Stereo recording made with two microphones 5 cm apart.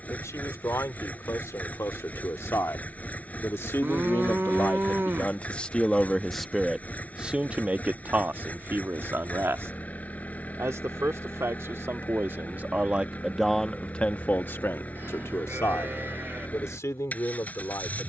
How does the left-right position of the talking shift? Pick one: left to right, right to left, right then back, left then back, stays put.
right then back.